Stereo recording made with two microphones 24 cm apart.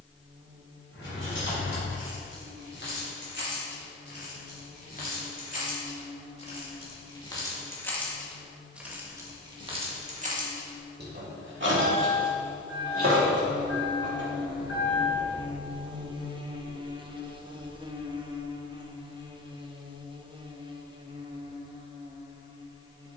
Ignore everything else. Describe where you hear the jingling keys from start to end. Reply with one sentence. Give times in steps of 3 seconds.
In this clip you hear the jingling keys on the left from 0 s, in the centre from 6 s, on the right from 9 s and not at all from 18 s.